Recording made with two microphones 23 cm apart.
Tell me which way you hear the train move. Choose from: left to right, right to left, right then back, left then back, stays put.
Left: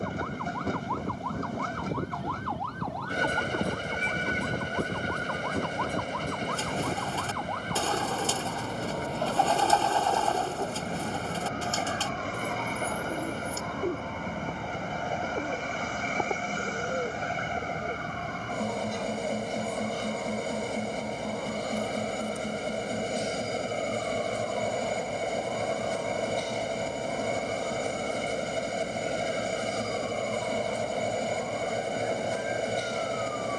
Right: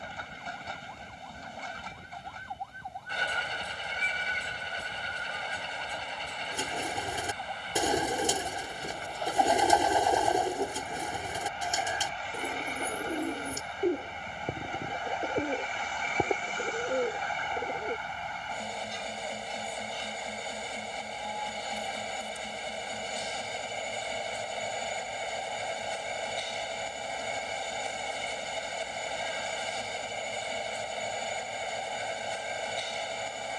stays put.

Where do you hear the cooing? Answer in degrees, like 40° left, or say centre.
20° right.